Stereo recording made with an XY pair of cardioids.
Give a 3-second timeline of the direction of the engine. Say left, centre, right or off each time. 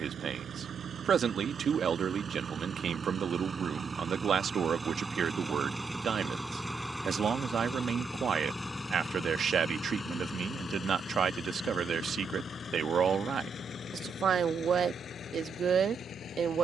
right, right, centre, left, left, left.